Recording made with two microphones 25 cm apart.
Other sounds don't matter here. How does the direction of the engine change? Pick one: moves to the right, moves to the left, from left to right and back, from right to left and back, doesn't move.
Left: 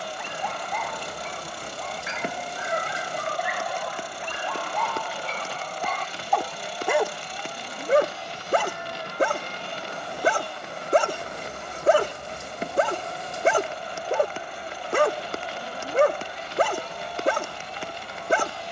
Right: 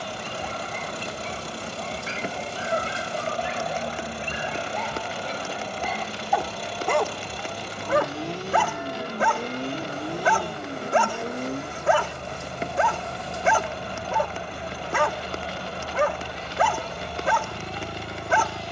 doesn't move.